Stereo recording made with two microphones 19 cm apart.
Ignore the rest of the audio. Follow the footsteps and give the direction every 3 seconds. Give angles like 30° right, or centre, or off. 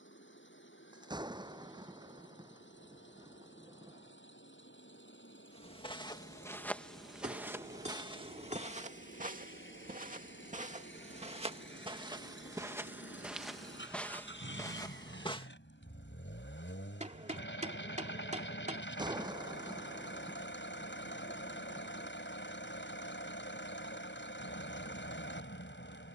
off, 30° left, 10° right, 40° right, centre, 20° left, off, off, off.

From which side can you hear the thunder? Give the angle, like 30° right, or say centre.
20° right.